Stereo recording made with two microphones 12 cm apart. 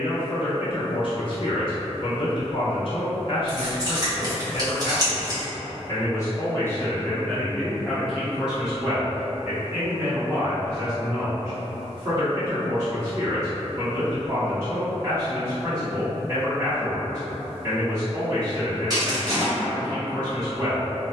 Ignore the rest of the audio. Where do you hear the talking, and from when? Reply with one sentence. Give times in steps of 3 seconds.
You can hear the talking on the left from 0 s, in the centre from 6 s and on the right from 9 s.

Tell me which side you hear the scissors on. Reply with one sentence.
You can hear the scissors on the right.